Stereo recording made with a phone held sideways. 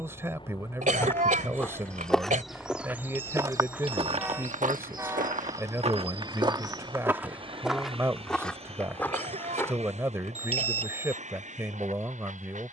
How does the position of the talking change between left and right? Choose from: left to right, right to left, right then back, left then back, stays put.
stays put.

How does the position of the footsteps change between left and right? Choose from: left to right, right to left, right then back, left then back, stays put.
right then back.